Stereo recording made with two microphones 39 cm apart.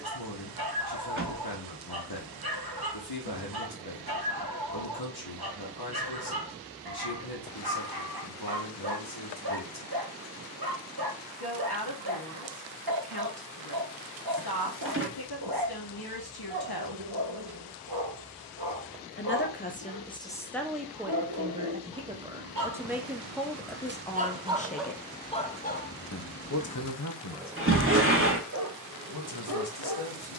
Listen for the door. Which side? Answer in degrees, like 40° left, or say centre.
30° right.